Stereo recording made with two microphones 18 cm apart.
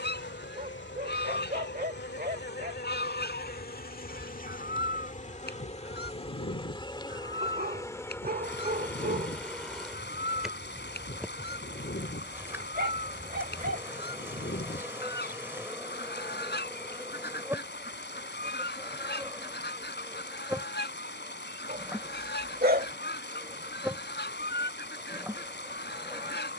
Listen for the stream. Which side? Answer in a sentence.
In this clip you hear the stream on the left.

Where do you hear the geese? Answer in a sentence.
You can hear the geese on the left.